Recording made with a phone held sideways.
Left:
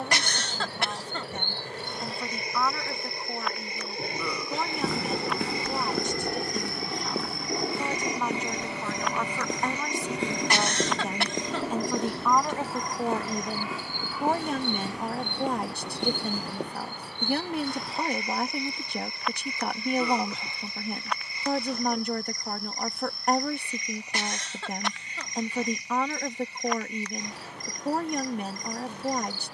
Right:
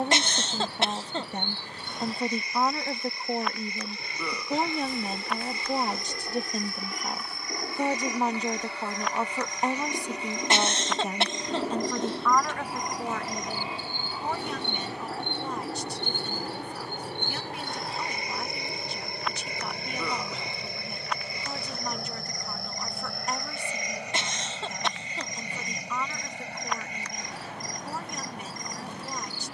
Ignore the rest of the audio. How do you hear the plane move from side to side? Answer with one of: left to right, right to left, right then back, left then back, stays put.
left to right.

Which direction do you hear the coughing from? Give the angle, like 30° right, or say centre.
20° right.